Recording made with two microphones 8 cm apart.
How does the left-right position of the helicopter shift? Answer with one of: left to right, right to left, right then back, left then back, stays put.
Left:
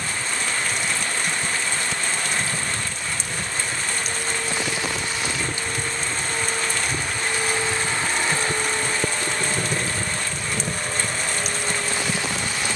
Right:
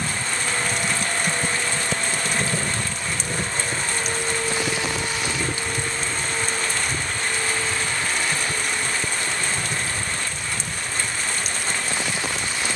right to left.